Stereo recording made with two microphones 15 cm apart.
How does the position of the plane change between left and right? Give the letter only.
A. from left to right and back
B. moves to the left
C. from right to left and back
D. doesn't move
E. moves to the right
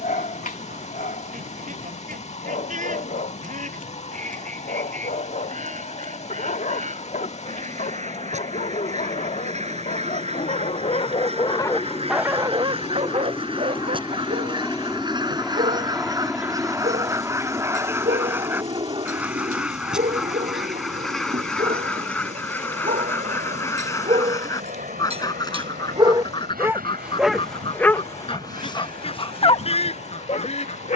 E.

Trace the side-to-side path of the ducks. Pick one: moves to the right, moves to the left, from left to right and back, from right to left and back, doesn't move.
moves to the left.